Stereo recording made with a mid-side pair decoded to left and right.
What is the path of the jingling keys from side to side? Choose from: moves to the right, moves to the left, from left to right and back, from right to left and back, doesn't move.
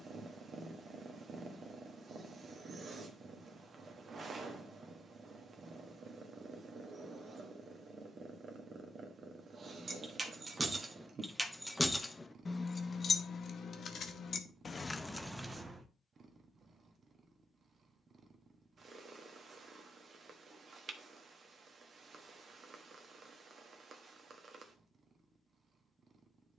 from right to left and back.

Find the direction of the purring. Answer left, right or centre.
right.